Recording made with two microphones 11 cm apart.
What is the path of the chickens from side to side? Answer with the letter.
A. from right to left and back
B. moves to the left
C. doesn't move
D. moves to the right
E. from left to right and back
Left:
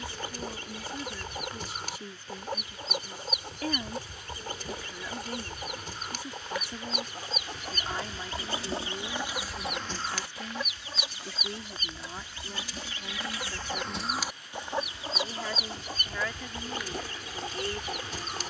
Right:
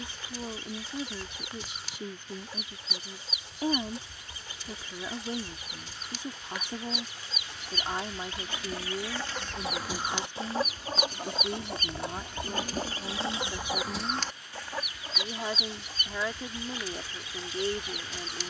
E.